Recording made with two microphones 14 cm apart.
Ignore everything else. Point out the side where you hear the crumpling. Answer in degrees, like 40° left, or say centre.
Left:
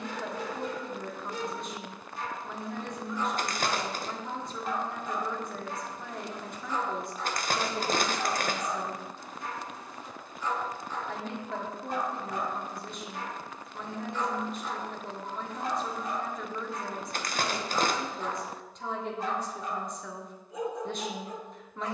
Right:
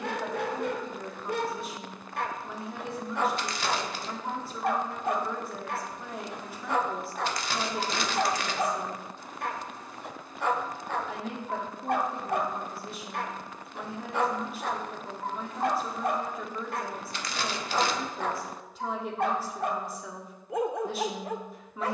50° left.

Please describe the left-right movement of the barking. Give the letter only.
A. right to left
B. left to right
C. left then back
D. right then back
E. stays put
E.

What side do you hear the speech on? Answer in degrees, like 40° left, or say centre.
centre.